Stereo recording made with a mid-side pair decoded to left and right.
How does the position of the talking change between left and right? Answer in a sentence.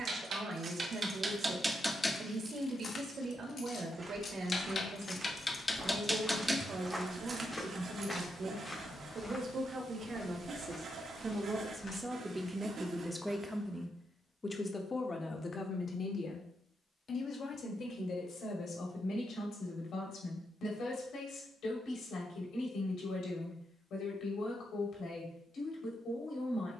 In this clip you hear the talking move to the left.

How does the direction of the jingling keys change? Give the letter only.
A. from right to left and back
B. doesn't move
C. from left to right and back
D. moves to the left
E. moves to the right
A.